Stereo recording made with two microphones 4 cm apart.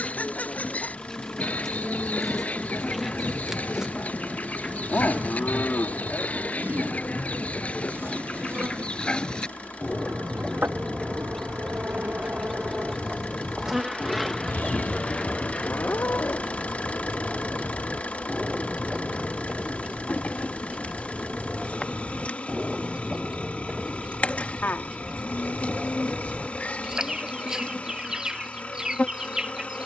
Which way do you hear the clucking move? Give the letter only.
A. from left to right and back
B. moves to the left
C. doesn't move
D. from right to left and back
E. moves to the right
E.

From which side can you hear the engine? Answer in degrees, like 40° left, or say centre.
30° left.